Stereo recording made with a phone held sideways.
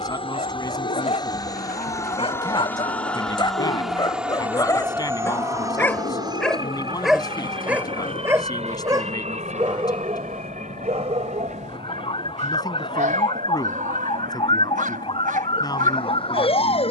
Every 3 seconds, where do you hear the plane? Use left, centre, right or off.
left, centre, right, right, right, right.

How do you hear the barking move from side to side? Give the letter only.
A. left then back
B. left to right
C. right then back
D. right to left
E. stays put
B.